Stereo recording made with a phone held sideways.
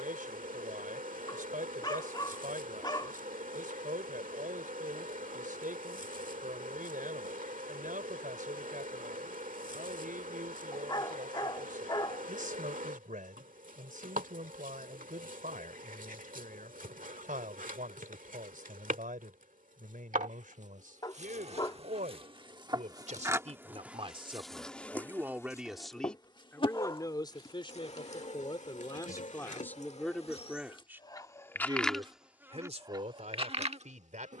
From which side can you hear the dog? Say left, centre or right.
left.